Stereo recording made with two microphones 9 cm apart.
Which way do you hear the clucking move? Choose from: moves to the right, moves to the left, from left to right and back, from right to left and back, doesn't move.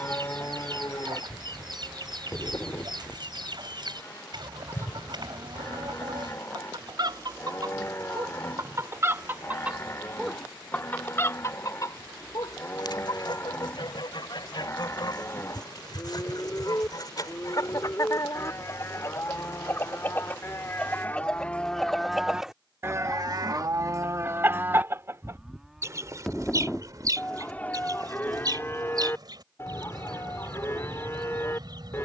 from right to left and back.